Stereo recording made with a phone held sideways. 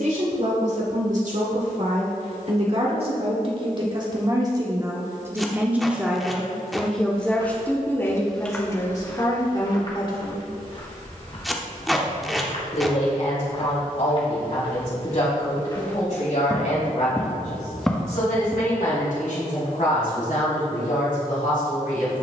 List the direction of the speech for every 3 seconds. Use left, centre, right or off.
right, right, centre, left, left, left, left, left.